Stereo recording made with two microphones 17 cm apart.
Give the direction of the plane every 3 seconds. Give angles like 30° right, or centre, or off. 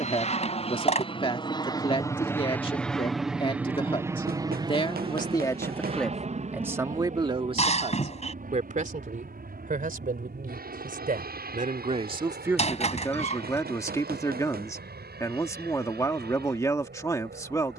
30° left, 20° right, 50° right, 60° right, 70° right, 70° right.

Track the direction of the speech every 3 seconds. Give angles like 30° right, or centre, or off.
30° left, 30° left, 30° right, 60° right, 10° left, 20° left.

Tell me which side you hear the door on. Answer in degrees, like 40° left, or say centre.
40° left.